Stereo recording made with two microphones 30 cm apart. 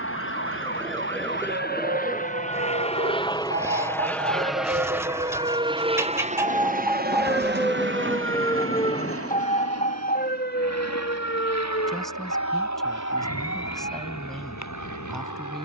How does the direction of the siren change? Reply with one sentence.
In this clip you hear the siren travel towards the left.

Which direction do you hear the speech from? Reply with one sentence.
You can hear the speech in the centre.